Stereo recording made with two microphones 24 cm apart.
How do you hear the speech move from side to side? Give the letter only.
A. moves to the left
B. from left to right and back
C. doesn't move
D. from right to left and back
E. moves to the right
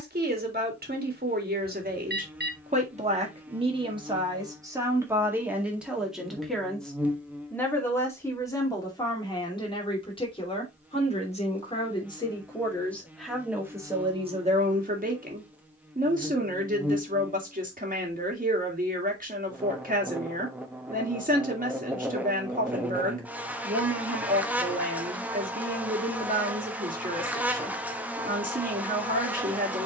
D.